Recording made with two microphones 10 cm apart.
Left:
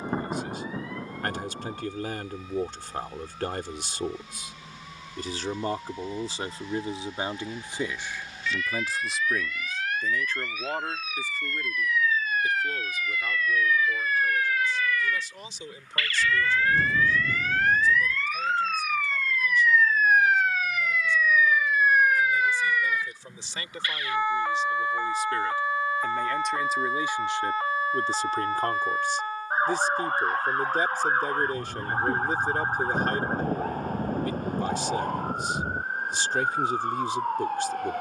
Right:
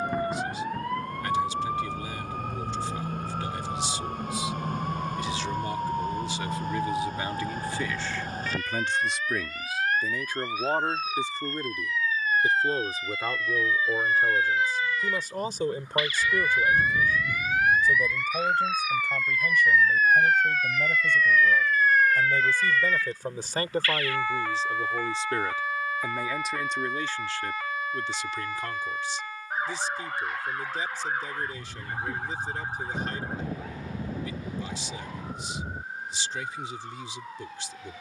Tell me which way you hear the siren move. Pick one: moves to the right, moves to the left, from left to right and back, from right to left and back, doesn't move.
moves to the left.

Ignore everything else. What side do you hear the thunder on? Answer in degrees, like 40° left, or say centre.
30° left.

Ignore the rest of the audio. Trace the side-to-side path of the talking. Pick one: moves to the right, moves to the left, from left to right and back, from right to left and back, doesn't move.
from left to right and back.